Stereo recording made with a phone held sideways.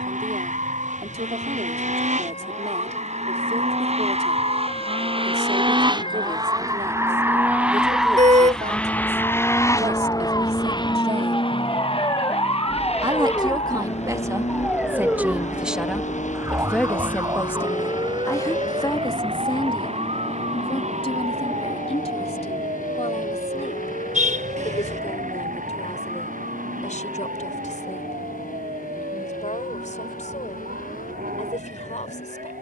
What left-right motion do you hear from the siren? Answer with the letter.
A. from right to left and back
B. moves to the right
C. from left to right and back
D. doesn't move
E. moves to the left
B.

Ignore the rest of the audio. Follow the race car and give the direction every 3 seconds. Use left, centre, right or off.
right, right, centre, left, left, left, left, left, left, left, left.